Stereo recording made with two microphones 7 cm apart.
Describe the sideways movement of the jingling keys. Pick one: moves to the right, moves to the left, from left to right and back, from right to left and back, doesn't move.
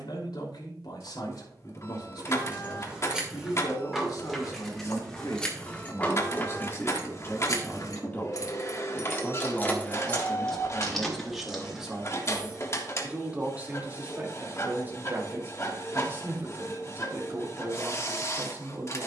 from right to left and back.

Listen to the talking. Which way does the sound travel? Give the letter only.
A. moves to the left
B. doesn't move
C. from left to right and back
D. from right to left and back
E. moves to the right
E.